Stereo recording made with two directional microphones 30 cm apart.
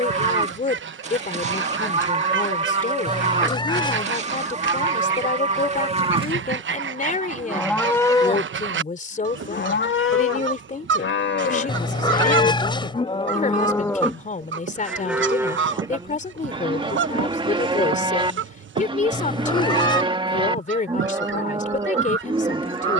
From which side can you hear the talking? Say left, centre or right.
left.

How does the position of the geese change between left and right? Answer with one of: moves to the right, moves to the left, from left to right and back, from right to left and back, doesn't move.
doesn't move.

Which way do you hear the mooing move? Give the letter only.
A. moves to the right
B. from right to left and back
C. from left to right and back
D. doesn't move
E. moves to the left
B.